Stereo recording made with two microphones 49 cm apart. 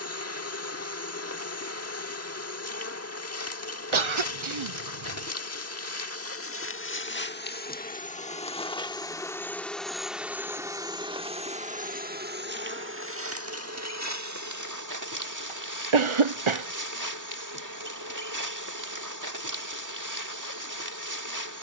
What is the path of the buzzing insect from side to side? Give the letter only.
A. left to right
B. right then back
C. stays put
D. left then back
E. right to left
A.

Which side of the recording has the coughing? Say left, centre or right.
right.